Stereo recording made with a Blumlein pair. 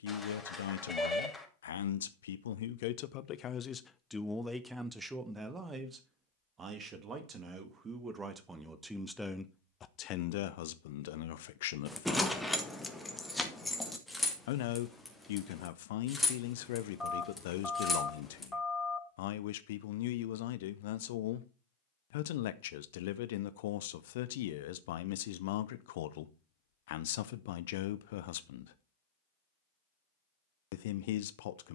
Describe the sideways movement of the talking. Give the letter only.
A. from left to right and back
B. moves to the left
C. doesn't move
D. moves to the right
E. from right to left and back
A.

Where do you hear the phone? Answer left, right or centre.
centre.